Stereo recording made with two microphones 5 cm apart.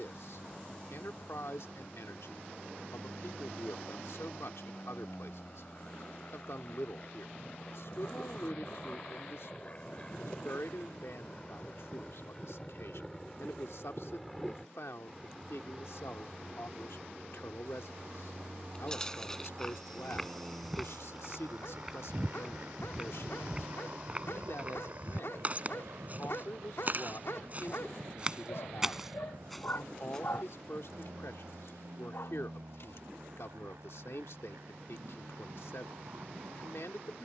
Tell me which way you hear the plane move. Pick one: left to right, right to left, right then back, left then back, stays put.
left to right.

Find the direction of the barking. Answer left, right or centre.
left.